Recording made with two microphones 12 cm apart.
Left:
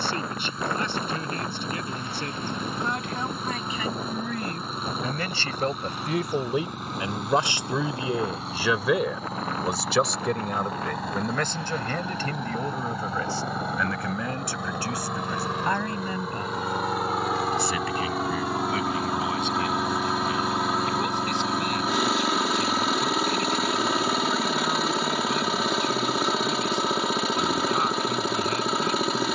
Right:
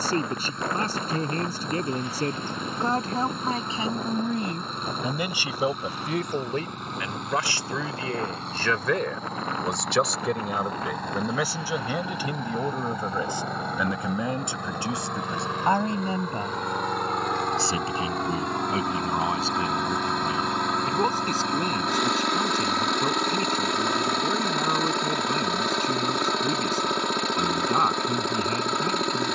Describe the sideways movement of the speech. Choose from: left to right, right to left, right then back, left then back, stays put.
left then back.